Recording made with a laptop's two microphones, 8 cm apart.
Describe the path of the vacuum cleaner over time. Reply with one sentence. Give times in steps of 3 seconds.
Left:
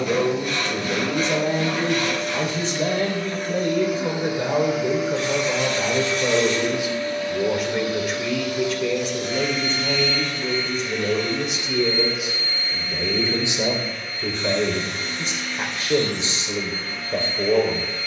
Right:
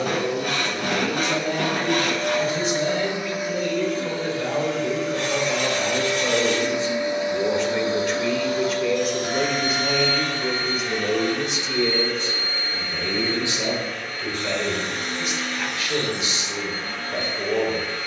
You can hear the vacuum cleaner on the right from 0 s, in the centre from 3 s and on the right from 6 s.